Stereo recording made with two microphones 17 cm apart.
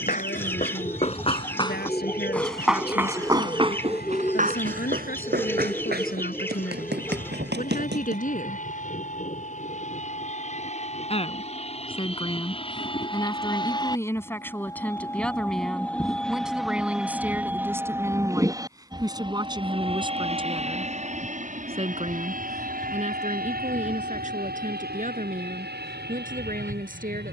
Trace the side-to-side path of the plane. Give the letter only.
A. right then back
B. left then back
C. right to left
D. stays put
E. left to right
E.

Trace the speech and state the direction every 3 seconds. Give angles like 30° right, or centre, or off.
70° left, 60° left, 50° left, 30° left, 20° left, centre, 20° right, 40° right, 50° right.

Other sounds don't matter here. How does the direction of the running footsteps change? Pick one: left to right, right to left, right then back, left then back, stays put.
left to right.